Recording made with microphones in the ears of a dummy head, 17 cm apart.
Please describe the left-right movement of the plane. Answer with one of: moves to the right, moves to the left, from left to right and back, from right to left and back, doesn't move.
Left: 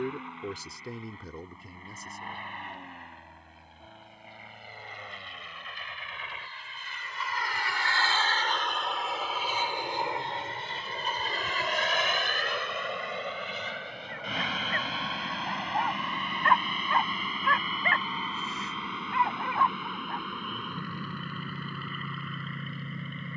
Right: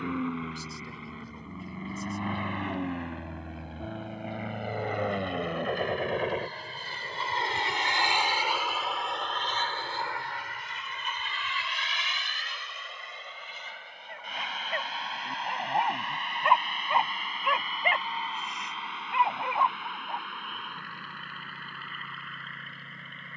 moves to the left.